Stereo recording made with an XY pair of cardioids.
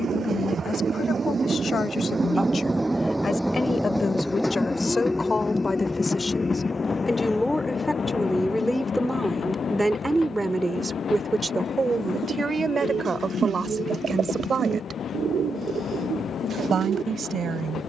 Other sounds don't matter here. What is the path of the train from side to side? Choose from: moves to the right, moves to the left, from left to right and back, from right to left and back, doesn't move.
moves to the left.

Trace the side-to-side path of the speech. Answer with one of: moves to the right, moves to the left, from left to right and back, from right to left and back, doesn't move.
moves to the right.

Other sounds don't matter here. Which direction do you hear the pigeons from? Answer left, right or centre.
right.